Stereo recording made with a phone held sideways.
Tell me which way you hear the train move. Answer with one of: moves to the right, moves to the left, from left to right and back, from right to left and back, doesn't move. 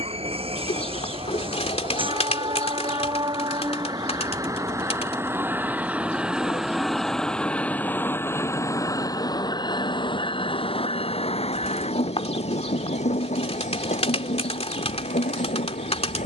moves to the left.